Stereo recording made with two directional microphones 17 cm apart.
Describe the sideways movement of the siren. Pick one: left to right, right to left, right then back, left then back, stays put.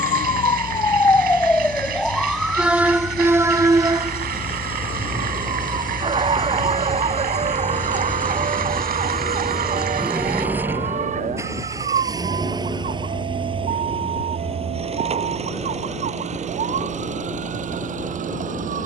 left to right.